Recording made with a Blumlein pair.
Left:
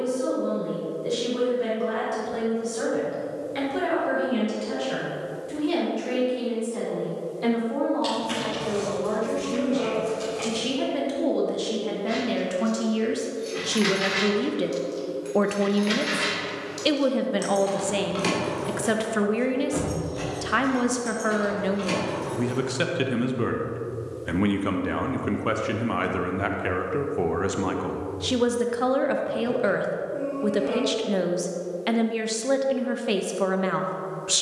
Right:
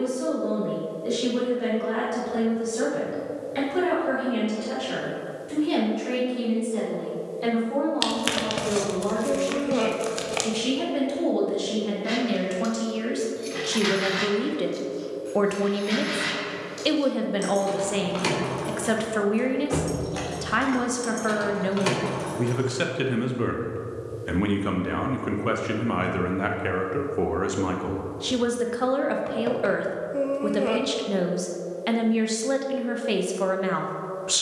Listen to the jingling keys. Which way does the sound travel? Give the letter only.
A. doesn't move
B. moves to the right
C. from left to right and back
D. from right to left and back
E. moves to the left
D.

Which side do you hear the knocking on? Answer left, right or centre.
right.